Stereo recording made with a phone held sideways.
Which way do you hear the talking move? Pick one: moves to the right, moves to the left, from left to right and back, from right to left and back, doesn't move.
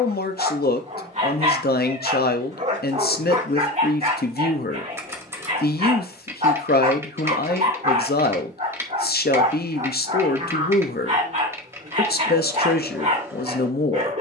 doesn't move.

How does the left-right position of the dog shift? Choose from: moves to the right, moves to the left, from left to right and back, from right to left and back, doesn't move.
doesn't move.